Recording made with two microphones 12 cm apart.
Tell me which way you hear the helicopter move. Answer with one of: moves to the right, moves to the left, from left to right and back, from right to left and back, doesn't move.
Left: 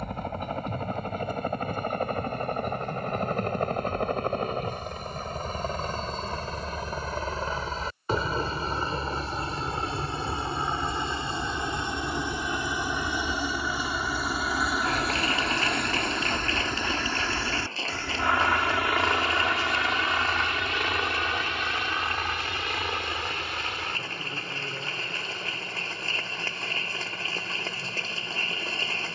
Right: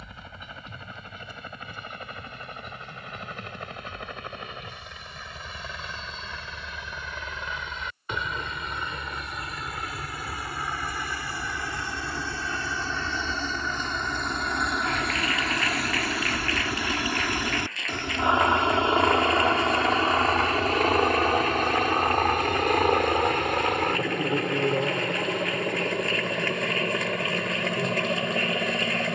moves to the right.